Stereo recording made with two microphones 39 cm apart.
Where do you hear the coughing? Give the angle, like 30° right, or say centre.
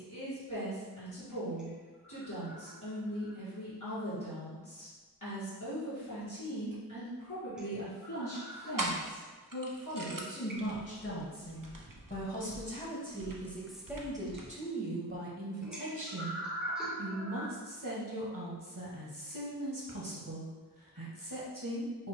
centre.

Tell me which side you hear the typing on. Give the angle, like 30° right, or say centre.
50° right.